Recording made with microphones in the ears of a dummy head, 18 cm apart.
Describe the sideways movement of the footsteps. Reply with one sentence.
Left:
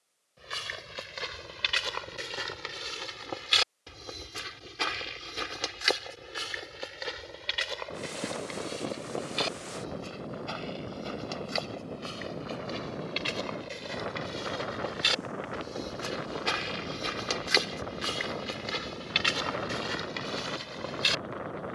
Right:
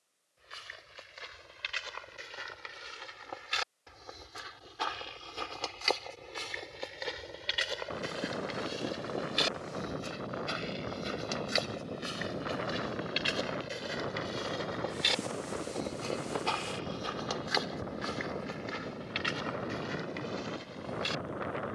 In this clip you hear the footsteps go right and come back.